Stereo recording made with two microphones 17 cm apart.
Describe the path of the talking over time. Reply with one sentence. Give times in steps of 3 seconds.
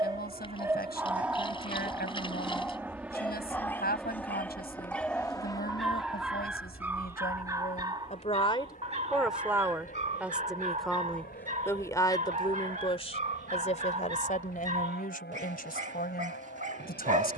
In this clip you hear the talking on the left from 0 s, in the centre from 9 s and on the left from 12 s.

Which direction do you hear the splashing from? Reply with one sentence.
You can hear the splashing on the left.